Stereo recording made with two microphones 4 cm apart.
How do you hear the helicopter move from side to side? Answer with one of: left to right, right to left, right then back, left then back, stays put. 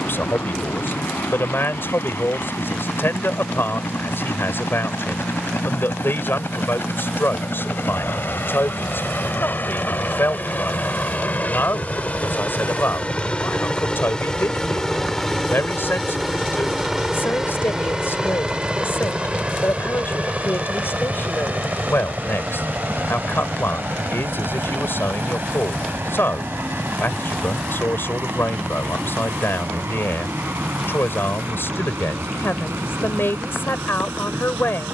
left to right.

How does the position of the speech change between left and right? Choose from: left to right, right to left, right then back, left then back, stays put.
stays put.